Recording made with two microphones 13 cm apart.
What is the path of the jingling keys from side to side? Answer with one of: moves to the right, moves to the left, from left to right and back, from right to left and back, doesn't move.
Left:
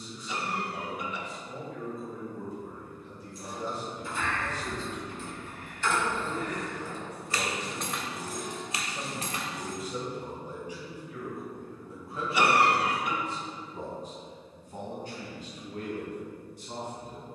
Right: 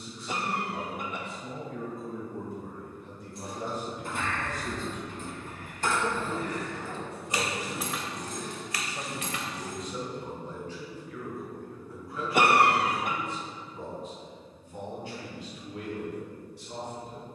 moves to the left.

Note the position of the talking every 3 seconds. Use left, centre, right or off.
right, right, right, centre, left, left.